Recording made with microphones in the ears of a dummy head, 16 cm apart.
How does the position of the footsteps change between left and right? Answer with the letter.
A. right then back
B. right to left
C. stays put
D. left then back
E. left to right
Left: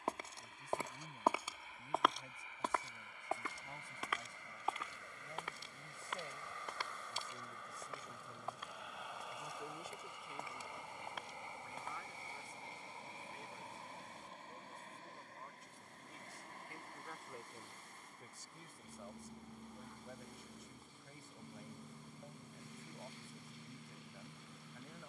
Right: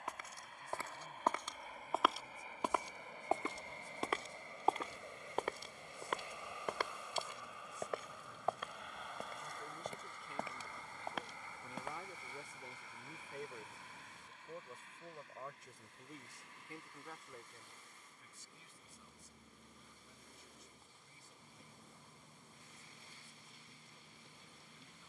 E.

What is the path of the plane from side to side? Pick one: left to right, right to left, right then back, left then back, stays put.
right to left.